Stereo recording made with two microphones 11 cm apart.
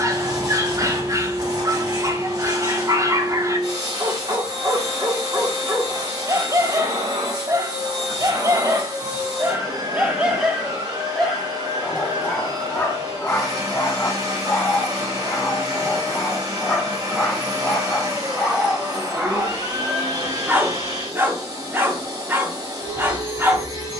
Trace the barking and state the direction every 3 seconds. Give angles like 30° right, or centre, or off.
30° right, 30° right, 30° right, centre, 20° left, 10° left, 10° right, 20° right.